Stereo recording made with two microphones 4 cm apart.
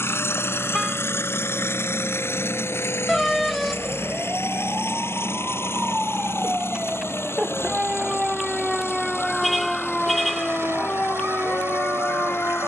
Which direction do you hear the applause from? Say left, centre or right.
right.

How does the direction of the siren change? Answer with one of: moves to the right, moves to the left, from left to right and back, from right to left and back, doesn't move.
moves to the left.